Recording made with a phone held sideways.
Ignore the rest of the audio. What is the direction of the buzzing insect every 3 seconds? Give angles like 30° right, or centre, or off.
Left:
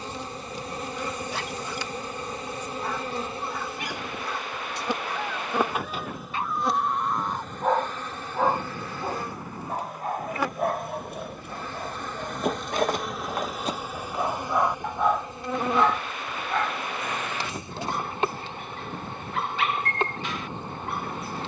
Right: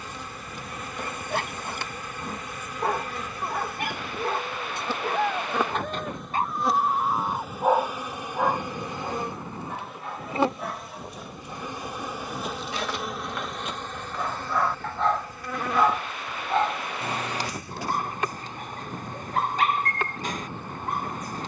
30° left, 20° left, 10° right, 20° right, centre, 20° left, 20° left.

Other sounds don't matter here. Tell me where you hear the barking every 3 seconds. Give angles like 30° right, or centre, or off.
50° right, 50° right, 20° right, 50° left, 40° left, 20° right, 40° right.